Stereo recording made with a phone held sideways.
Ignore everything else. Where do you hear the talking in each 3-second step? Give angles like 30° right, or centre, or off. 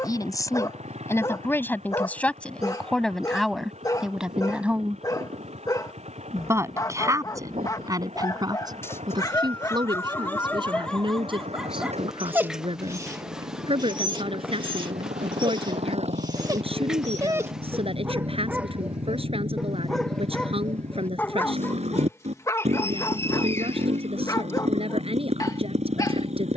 20° left, centre, 30° right, 40° right, 50° right, 50° right, 50° right, 50° right, 50° right.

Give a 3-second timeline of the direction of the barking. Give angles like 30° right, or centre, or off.
30° left, 30° left, 30° left, 10° left, 30° right, 30° right, centre, 20° left, 30° left.